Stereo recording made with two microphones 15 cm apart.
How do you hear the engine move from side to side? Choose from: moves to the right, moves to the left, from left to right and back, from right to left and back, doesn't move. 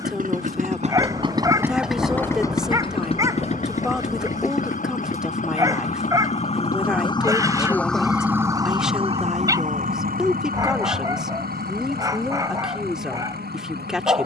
moves to the left.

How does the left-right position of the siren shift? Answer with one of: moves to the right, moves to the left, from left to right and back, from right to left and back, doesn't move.
moves to the right.